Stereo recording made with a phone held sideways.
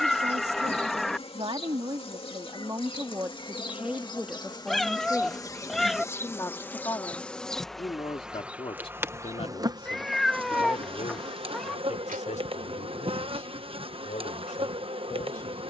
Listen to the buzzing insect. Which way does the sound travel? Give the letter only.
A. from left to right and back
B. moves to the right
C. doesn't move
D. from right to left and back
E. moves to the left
B.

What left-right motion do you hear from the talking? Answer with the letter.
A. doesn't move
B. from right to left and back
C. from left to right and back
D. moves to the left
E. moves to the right
D.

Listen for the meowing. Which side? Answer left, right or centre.
centre.